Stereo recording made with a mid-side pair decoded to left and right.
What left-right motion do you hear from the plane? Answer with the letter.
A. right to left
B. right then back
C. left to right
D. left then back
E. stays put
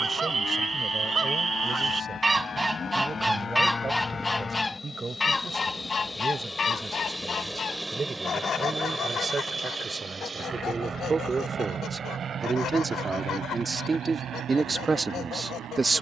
C.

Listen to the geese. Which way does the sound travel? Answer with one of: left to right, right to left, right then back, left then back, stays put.
right to left.